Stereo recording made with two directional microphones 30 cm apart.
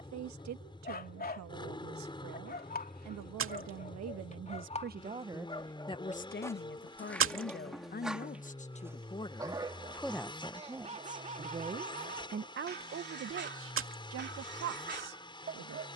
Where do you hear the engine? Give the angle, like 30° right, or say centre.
20° left.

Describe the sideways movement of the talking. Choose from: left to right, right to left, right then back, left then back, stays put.
left then back.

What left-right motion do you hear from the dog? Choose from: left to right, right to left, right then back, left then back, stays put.
left to right.